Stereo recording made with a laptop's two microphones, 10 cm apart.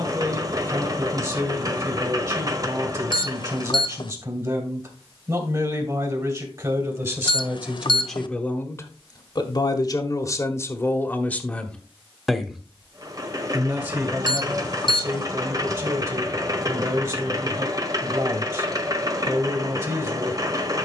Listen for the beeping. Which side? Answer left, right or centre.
left.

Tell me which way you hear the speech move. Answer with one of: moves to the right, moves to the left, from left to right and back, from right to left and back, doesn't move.
from right to left and back.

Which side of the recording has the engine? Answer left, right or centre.
right.